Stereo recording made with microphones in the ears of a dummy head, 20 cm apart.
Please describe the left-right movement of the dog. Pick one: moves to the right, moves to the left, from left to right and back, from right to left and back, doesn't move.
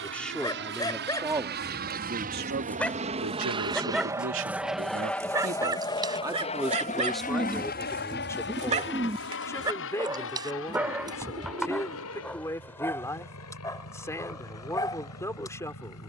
from left to right and back.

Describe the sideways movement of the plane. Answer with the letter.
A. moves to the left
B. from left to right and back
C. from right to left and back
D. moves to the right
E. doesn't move
A.